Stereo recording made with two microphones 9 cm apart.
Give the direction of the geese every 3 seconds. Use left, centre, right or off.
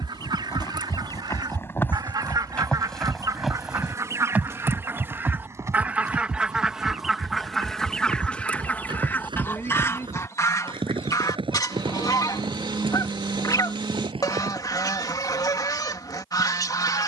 right, right, centre, left, left, left.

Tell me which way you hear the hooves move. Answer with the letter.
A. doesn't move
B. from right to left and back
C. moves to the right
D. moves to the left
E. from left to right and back
C.